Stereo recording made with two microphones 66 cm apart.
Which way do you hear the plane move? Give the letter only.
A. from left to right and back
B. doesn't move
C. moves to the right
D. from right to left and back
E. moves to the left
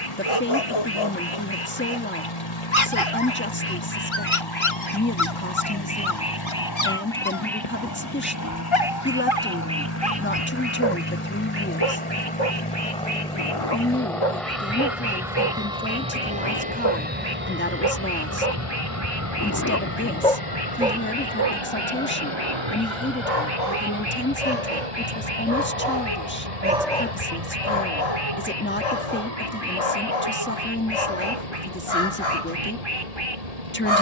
C.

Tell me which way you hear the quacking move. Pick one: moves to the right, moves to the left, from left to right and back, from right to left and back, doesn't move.
moves to the right.